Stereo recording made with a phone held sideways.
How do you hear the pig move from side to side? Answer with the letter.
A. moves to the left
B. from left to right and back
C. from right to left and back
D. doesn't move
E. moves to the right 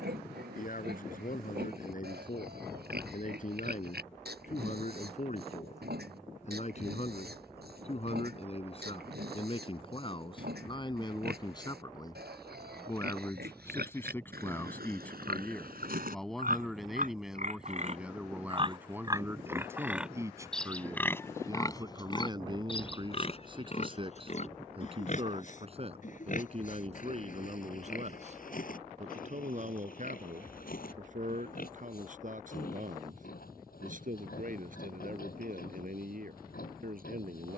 A.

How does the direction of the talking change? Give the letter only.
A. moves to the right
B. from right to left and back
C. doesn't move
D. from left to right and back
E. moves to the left
A.